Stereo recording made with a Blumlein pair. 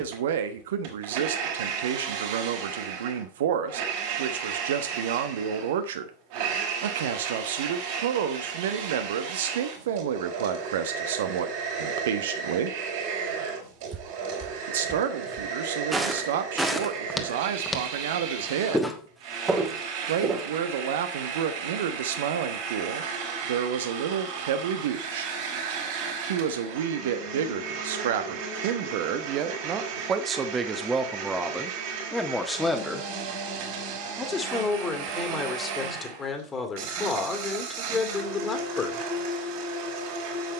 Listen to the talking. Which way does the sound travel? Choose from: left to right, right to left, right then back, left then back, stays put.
right to left.